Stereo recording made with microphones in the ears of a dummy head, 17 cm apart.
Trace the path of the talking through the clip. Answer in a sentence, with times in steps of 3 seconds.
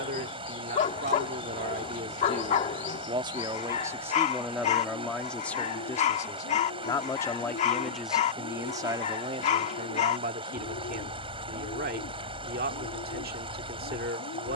You can hear the talking on the right from 0 s, in the centre from 3 s and on the right from 9 s.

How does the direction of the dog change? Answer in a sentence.
In this clip you hear the dog stay put.